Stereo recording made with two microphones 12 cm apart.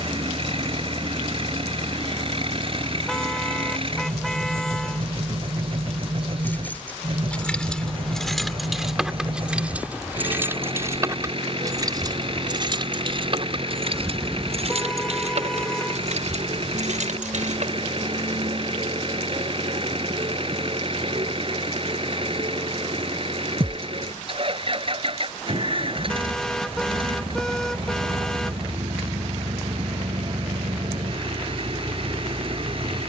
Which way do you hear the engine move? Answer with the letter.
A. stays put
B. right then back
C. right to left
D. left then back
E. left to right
A.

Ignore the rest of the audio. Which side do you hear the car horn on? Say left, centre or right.
centre.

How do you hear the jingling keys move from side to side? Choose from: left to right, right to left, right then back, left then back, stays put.
left to right.